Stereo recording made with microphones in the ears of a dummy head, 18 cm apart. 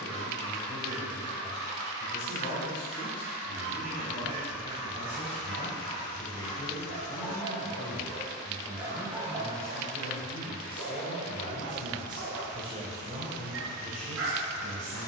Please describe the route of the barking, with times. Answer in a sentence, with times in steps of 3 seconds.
In this clip you hear the barking on the right from 0 s, in the centre from 6 s and on the right from 9 s.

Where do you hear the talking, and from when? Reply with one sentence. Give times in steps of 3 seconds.
In this clip you hear the talking on the left from 0 s, in the centre from 9 s and on the right from 12 s.